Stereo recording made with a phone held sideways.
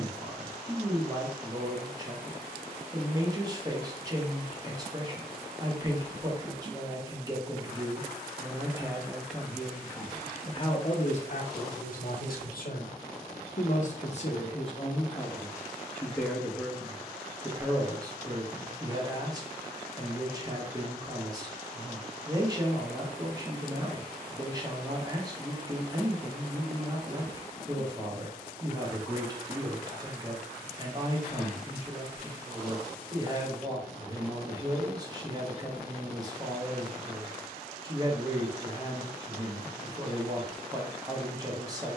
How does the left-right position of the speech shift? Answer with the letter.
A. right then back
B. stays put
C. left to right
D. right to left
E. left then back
E.